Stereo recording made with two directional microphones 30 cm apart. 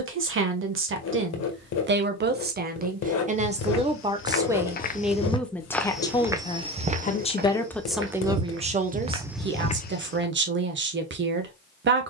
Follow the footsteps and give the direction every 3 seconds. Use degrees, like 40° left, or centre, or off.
off, 30° left, 30° right, 10° left.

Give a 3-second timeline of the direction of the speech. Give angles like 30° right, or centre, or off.
40° right, 10° right, centre, 40° right.